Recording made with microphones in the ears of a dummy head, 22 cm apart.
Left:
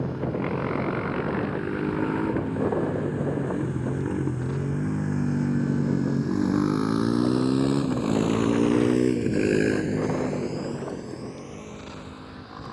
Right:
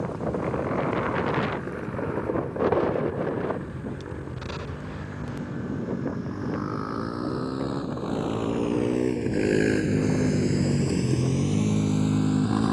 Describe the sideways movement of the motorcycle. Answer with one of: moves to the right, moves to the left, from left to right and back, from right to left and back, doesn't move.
moves to the right.